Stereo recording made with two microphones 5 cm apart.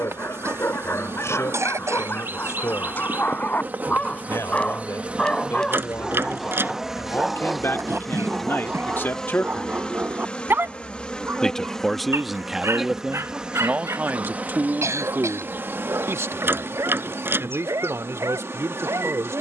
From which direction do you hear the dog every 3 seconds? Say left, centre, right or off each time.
left, left, centre, right, right, right, right.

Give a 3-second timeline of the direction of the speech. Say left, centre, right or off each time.
left, left, left, left, right, right, right.